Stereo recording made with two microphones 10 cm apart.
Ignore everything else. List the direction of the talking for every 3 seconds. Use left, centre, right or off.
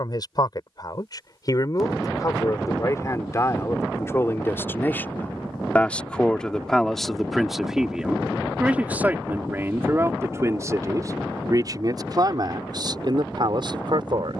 left, left, centre, right, right.